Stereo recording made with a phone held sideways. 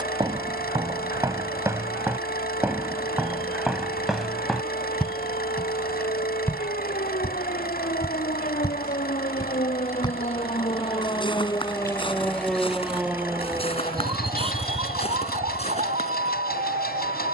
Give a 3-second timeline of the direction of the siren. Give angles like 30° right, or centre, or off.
70° left, 70° left, 60° left, 40° left, 20° right, 50° right.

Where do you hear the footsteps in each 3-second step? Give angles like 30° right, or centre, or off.
20° right, centre, 20° left, 30° left, 40° left, 40° left.